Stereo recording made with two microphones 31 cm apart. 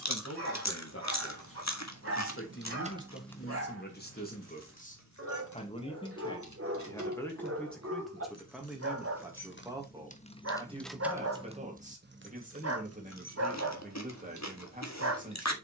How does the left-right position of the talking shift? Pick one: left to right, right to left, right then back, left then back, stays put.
left to right.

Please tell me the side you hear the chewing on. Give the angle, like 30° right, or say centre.
60° left.